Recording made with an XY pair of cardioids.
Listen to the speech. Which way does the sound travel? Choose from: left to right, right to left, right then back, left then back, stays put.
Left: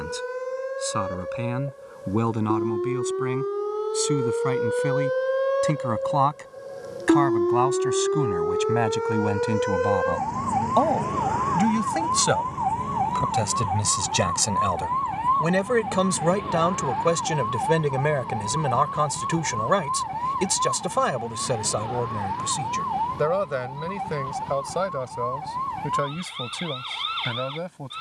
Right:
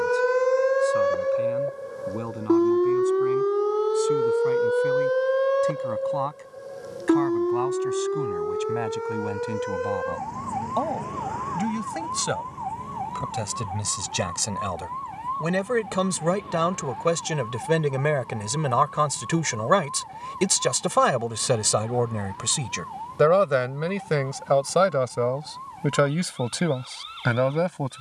left to right.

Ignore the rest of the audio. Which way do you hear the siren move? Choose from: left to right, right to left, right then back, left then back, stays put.
right to left.